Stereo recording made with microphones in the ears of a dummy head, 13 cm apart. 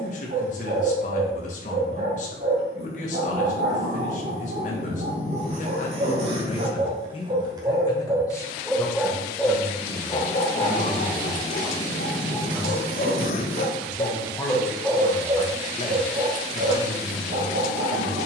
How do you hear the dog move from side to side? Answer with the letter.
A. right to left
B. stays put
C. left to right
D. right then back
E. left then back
E.